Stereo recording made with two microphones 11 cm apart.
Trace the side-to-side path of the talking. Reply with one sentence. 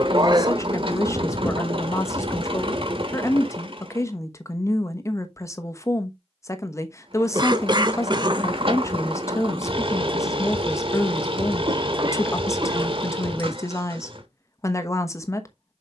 You can hear the talking stay put.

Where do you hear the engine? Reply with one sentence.
You can hear the engine on the right.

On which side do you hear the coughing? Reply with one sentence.
You can hear the coughing on the right.